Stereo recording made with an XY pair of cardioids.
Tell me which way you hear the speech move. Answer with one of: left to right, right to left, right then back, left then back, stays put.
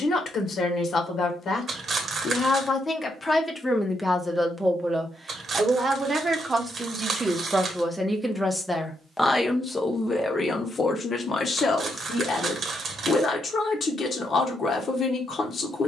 right then back.